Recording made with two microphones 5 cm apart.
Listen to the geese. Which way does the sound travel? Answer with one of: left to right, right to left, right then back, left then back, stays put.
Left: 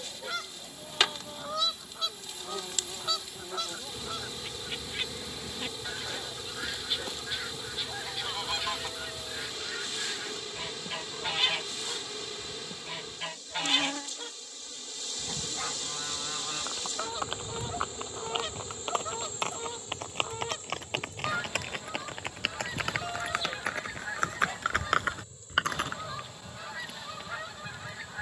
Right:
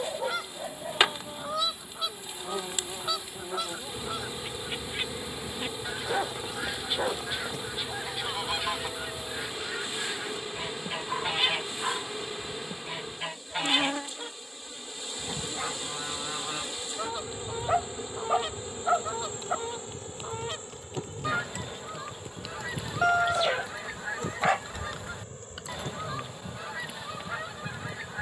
stays put.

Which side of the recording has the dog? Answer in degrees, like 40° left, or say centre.
80° right.